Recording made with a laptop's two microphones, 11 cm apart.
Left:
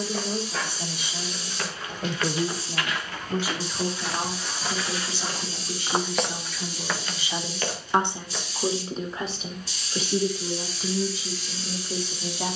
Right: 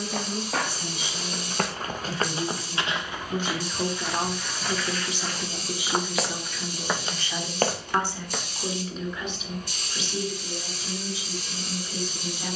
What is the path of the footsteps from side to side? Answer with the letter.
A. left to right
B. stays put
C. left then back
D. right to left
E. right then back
C.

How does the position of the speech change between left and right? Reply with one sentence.
In this clip you hear the speech move from left to right and back again.